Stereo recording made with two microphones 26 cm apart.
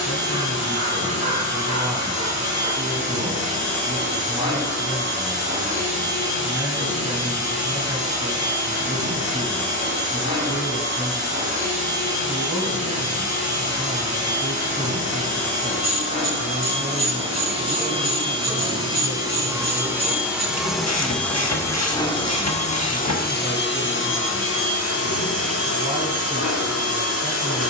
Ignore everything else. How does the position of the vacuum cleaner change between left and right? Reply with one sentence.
In this clip you hear the vacuum cleaner travel towards the left.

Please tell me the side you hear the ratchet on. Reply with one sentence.
You can hear the ratchet on the left.